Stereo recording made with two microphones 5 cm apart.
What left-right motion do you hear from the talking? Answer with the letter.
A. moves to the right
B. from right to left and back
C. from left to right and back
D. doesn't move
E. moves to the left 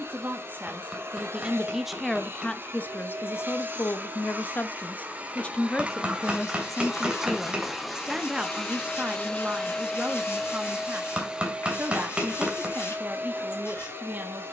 B.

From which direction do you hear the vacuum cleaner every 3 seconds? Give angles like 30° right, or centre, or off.
40° right, 30° right, centre, centre, 40° right.